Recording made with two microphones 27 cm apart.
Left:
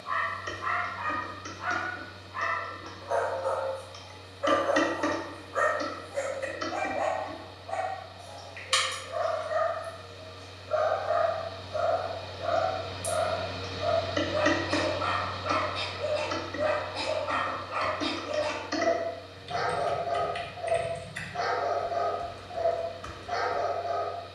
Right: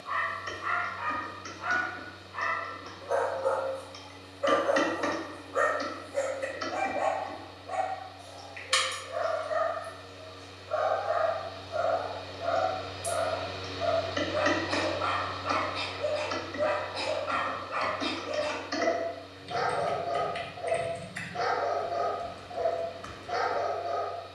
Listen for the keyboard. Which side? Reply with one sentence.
You can hear the keyboard on the left.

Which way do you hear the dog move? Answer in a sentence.
In this clip you hear the dog go left and come back.